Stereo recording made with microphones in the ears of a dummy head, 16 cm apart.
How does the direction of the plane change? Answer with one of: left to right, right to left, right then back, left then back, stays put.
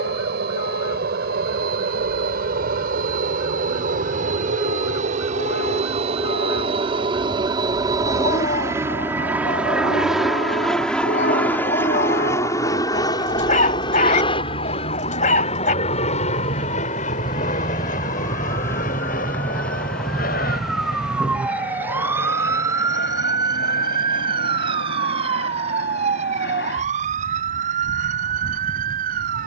right to left.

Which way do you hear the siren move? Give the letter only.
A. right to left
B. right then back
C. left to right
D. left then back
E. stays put
C.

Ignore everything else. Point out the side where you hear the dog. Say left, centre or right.
left.